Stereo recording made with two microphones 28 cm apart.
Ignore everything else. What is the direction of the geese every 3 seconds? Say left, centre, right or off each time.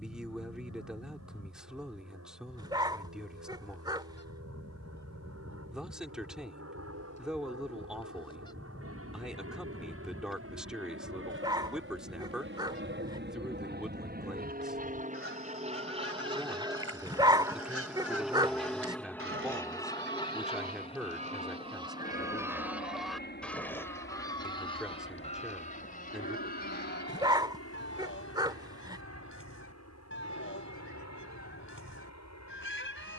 left, left, left, centre, right, right, right, centre, left, left, left.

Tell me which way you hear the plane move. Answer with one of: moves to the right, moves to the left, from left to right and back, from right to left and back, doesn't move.
moves to the left.